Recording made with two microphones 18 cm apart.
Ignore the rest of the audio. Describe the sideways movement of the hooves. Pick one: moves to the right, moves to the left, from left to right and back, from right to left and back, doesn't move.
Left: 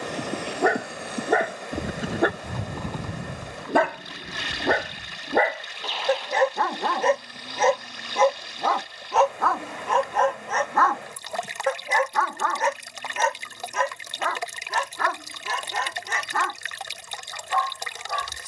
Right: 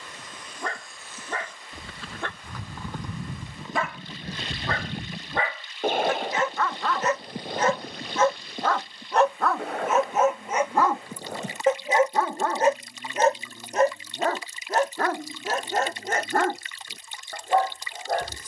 moves to the right.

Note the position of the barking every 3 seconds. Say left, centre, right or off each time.
left, left, left, centre, right, right.